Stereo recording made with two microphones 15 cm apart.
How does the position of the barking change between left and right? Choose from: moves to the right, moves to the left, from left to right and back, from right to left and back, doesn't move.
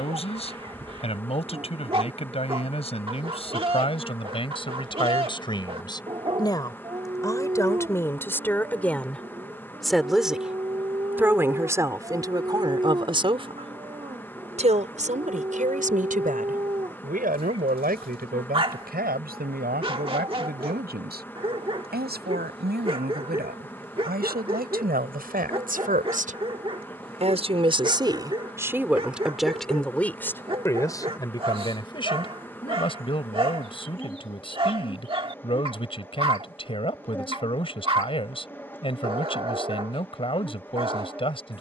doesn't move.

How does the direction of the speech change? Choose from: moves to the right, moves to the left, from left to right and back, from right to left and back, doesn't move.
from left to right and back.